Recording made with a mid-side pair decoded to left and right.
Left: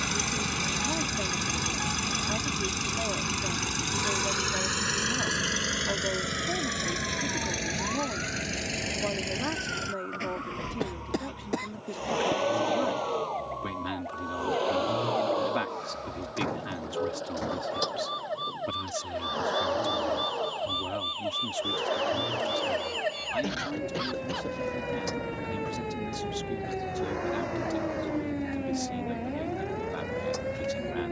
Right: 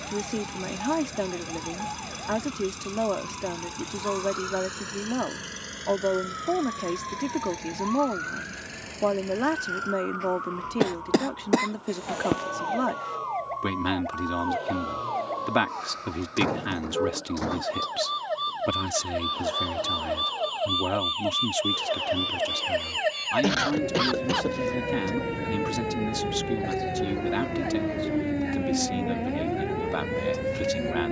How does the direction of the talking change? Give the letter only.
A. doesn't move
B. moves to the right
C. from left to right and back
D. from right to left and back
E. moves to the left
A.